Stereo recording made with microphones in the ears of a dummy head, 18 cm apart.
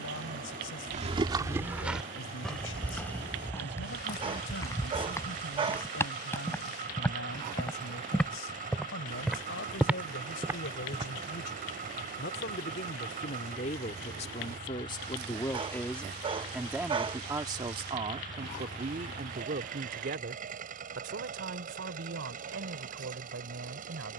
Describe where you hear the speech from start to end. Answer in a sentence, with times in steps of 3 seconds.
In this clip you hear the speech on the left from 0 s, in the centre from 15 s and on the right from 18 s.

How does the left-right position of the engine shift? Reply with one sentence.
In this clip you hear the engine stay in one place.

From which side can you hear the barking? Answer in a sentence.
You can hear the barking on the right.